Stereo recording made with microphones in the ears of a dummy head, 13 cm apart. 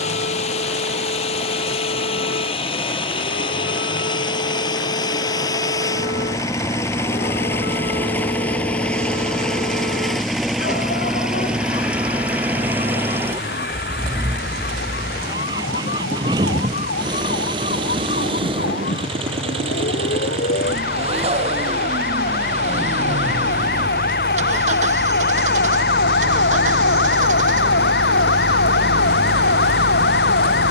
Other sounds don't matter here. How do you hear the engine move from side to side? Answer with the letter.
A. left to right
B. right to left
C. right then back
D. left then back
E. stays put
A.